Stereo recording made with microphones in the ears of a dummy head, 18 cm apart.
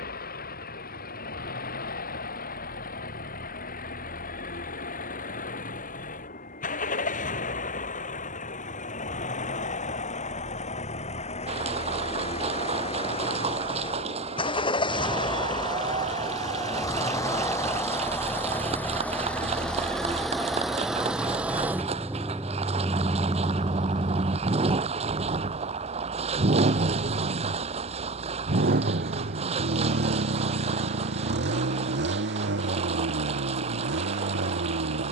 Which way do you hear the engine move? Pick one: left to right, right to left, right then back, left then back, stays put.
left to right.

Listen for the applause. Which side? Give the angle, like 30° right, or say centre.
30° right.